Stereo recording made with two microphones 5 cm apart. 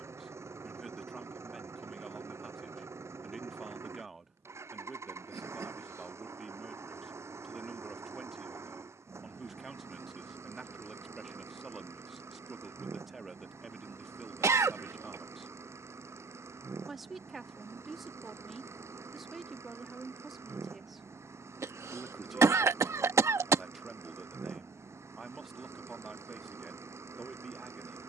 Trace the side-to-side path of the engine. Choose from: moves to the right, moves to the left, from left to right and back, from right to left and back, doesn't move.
doesn't move.